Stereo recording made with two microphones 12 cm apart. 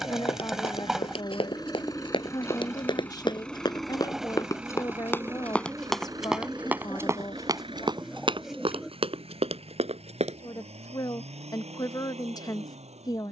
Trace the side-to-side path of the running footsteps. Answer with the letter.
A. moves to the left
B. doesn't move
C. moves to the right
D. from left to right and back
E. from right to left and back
C.